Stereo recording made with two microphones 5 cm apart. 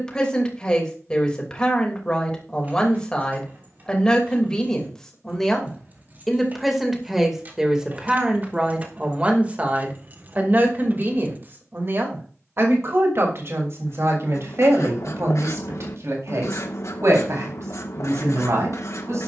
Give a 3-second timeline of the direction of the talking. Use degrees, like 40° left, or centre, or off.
20° left, 10° left, 10° right, 40° right, 60° right, 70° right, 80° right.